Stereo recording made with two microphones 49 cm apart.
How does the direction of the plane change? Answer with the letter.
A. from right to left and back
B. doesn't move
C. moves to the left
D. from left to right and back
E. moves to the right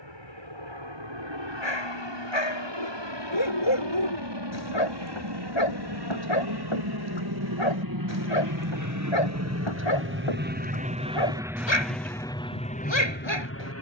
C.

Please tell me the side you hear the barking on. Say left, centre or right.
left.